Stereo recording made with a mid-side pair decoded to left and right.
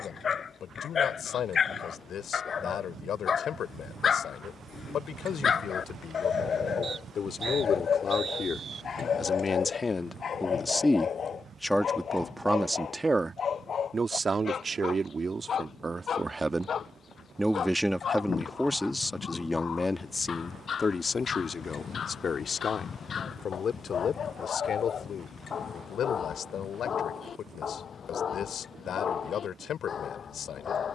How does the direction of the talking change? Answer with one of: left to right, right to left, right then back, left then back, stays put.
right then back.